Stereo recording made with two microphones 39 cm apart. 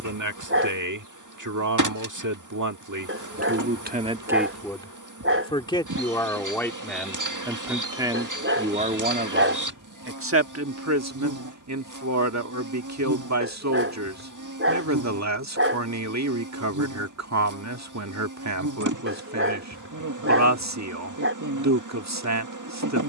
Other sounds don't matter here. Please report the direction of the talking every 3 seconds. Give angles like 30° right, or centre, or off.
50° right, 10° right, centre, 30° right, 40° right, 40° right, 40° right, 40° right.